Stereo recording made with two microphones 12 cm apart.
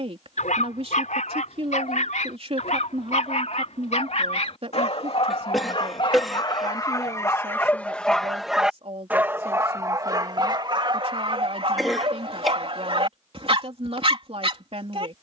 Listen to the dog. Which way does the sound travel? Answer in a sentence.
You can hear the dog move to the right.